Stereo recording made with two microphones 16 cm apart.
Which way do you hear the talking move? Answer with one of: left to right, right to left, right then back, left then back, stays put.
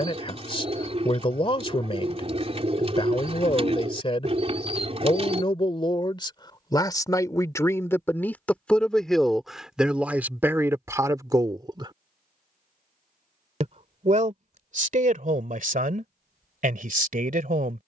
left to right.